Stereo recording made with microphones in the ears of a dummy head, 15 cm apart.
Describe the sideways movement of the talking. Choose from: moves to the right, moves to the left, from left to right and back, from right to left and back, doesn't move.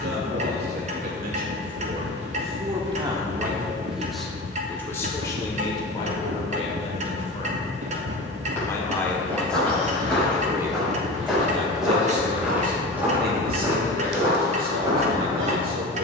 from right to left and back.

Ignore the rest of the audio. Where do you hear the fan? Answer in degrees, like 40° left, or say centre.
70° right.